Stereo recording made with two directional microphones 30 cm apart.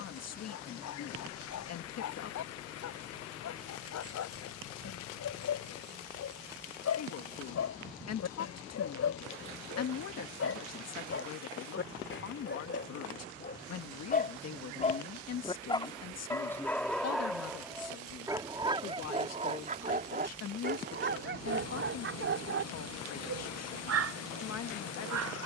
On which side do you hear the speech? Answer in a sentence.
In this clip you hear the speech on the left.